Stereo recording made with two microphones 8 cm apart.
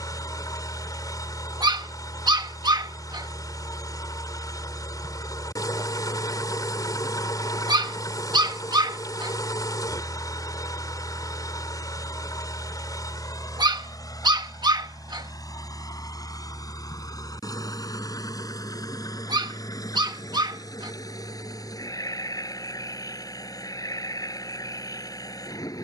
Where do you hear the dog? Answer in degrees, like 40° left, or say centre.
70° right.